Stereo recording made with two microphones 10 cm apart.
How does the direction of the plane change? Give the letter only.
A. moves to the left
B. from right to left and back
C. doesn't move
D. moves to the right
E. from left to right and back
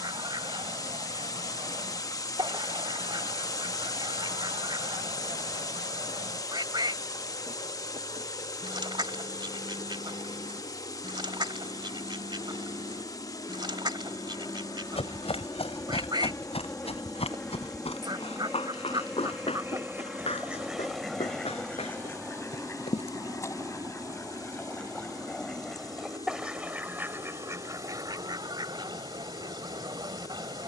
D.